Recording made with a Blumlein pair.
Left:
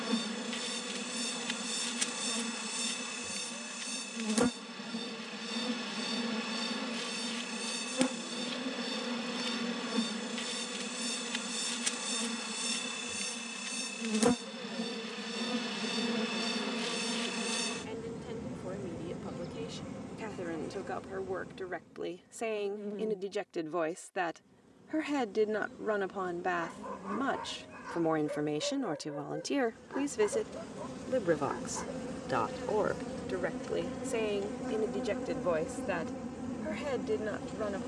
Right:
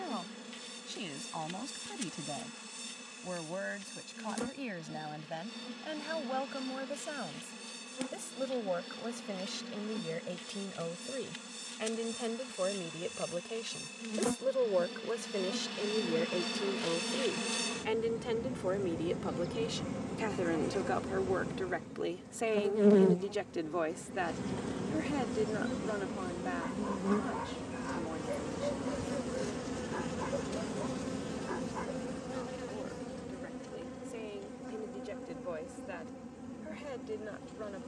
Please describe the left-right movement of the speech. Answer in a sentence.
You can hear the speech move to the left.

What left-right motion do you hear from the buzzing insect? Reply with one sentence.
In this clip you hear the buzzing insect go right and come back.